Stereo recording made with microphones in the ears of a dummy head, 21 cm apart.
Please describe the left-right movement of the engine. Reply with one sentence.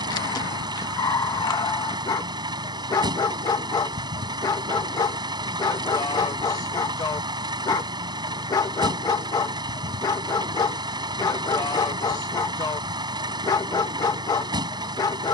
You can hear the engine stay put.